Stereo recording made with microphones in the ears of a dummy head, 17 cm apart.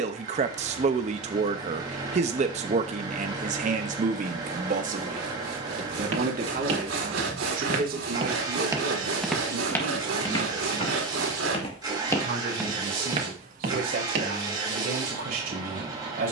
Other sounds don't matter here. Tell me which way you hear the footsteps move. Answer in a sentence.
You can hear the footsteps move from right to left and back again.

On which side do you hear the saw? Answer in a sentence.
In this clip you hear the saw on the right.